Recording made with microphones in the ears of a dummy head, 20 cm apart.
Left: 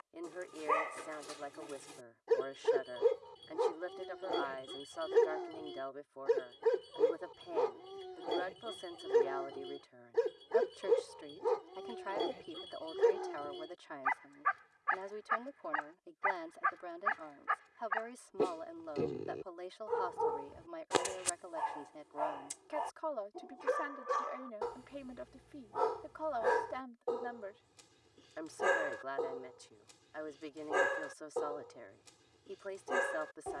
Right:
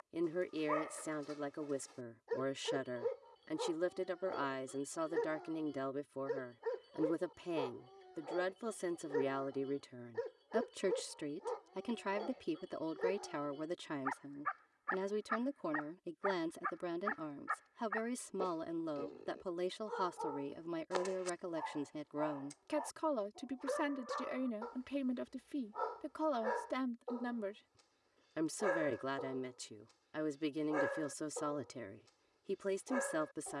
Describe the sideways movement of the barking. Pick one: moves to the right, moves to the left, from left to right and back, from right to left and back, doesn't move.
doesn't move.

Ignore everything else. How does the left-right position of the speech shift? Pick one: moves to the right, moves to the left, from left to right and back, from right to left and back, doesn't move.
doesn't move.